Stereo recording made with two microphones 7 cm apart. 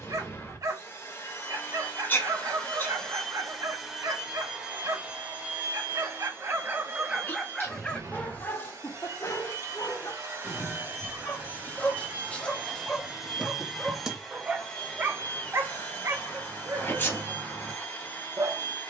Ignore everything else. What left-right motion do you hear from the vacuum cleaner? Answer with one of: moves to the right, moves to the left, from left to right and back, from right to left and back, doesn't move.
from left to right and back.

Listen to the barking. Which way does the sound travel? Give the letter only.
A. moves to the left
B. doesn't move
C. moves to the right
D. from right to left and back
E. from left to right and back
D.